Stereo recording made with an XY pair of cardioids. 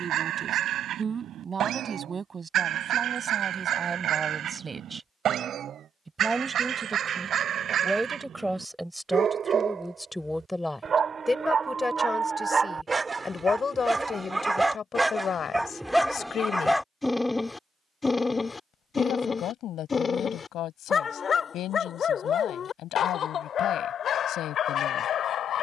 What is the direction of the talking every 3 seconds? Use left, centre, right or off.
right, right, centre, centre, left, left, left, left, left.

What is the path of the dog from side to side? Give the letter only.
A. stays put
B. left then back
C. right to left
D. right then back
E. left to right
C.